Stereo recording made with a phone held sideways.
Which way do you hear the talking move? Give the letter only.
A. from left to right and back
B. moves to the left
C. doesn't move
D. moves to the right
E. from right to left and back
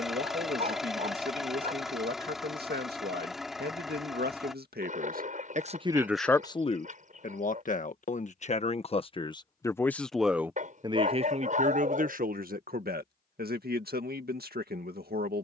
E.